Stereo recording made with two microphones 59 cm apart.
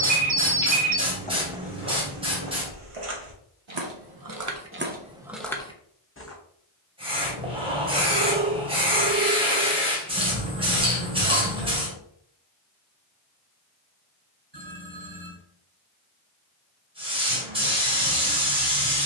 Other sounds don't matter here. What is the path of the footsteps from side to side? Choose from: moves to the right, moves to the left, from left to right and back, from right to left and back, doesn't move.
from left to right and back.